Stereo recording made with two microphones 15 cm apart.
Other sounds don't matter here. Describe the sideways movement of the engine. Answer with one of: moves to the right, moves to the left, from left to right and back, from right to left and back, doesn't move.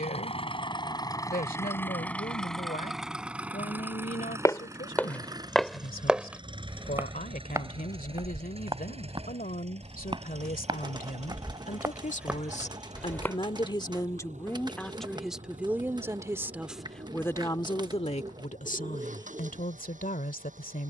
moves to the right.